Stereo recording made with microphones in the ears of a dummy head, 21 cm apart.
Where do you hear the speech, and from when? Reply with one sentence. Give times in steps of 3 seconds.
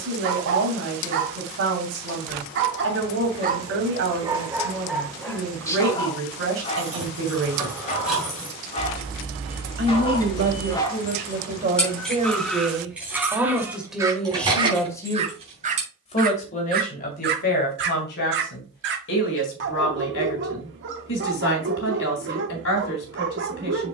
In this clip you hear the speech on the right from 0 s, in the centre from 12 s and on the left from 15 s.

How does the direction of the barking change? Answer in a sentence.
You can hear the barking go left and come back.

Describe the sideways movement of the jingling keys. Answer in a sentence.
In this clip you hear the jingling keys move from right to left and back again.